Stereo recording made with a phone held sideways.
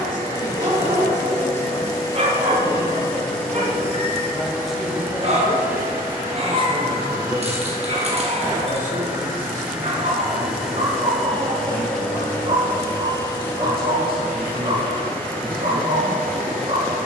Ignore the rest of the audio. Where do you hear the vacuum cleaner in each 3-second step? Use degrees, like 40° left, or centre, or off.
20° left, centre, 20° right, centre, 10° left, 10° left.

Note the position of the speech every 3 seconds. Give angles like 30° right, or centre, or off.
50° left, centre, 40° right, 60° right, 70° right, 80° right.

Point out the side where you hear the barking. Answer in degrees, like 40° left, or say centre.
40° right.